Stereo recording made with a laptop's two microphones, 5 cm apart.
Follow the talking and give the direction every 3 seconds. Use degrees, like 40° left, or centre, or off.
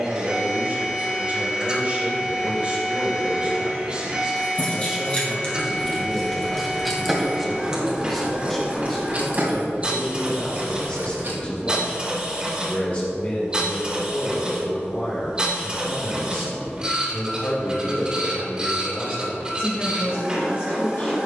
40° right, 20° right, centre, 20° left, 40° left, 50° left, 60° left.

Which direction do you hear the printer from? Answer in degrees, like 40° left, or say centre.
20° right.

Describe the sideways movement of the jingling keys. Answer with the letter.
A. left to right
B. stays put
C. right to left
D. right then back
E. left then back
A.